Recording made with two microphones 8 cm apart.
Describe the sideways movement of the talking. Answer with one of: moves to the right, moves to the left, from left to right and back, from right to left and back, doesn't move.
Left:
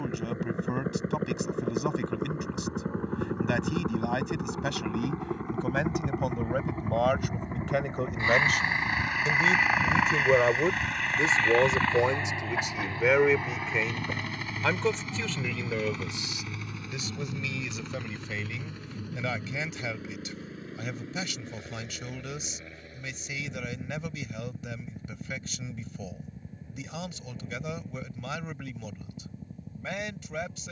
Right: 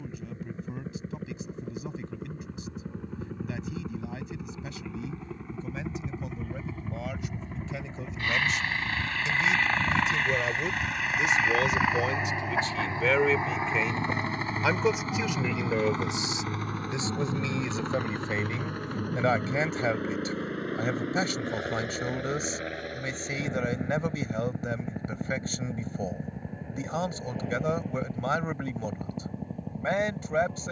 moves to the right.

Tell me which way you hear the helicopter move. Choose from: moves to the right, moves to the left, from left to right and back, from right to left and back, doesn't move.
moves to the right.